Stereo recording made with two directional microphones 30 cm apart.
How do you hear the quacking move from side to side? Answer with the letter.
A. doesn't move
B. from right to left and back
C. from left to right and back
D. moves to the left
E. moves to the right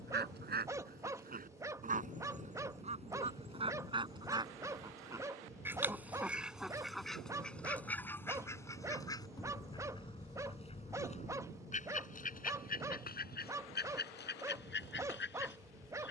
D.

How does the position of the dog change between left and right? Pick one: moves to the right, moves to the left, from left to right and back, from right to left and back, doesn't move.
doesn't move.